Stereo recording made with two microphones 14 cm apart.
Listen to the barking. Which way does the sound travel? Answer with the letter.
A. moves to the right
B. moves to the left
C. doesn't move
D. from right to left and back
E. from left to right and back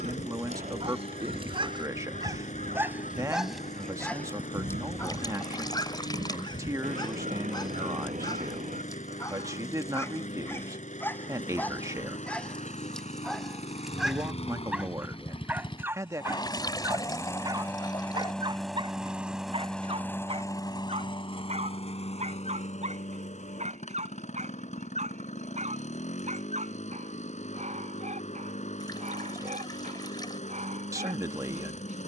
D.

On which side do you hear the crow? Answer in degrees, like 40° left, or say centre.
70° right.